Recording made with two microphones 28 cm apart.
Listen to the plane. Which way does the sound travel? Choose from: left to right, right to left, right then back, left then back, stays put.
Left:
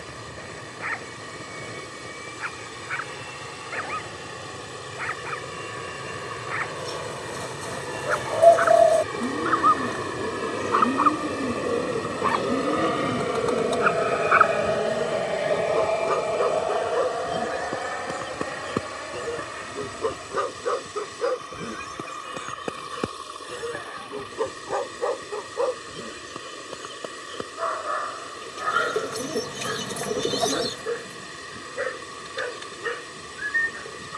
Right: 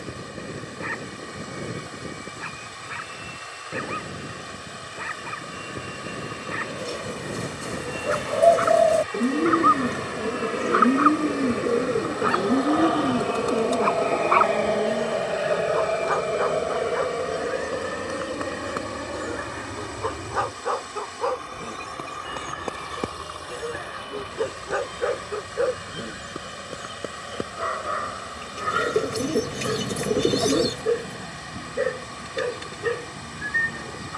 left to right.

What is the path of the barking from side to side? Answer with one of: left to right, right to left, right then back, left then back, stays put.
left then back.